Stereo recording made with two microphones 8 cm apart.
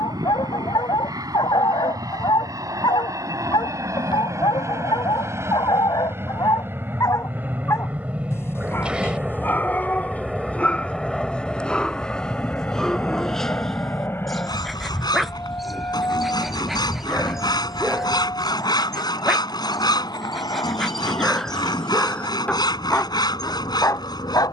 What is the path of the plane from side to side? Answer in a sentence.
In this clip you hear the plane move to the left.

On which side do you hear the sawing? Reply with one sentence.
You can hear the sawing on the left.